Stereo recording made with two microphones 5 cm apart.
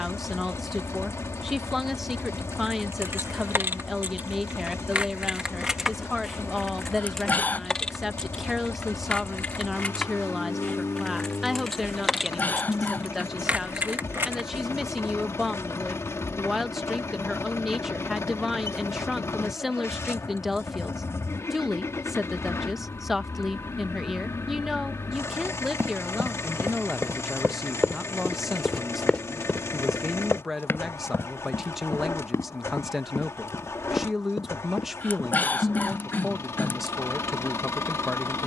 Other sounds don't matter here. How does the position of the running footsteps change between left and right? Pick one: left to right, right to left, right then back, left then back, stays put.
right to left.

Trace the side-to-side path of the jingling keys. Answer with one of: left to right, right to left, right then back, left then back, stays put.
left then back.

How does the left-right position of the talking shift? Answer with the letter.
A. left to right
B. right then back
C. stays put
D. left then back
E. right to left
C.